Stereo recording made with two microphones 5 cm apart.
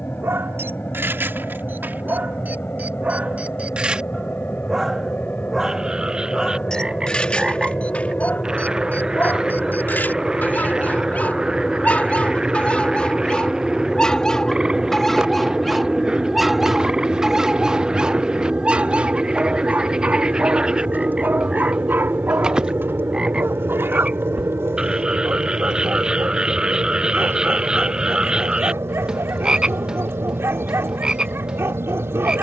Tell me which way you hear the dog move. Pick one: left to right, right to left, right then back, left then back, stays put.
left then back.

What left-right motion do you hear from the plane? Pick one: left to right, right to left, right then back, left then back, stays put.
left to right.